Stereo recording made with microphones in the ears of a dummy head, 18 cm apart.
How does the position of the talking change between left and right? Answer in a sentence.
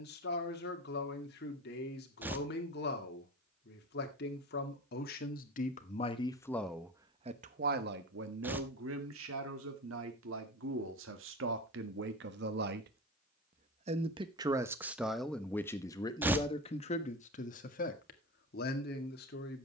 You can hear the talking go right and come back.